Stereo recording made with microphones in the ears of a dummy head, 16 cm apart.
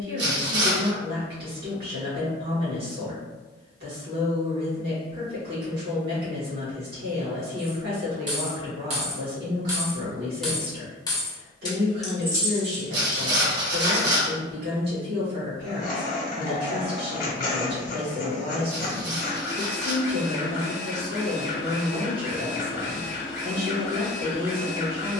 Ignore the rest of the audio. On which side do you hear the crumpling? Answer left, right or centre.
right.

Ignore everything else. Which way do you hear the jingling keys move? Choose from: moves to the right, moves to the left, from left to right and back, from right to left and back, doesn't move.
from right to left and back.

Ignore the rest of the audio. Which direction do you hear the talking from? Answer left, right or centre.
right.